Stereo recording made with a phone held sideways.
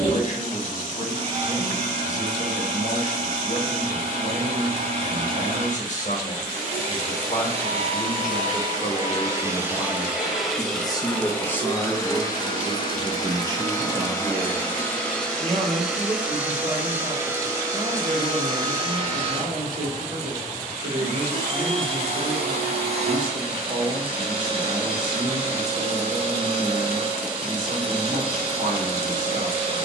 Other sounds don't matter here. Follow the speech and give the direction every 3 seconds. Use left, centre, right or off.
left, left, left, left, right, right, right, right, right, right.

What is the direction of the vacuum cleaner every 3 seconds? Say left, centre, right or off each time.
right, right, right, centre, left, centre, right, right, right, right.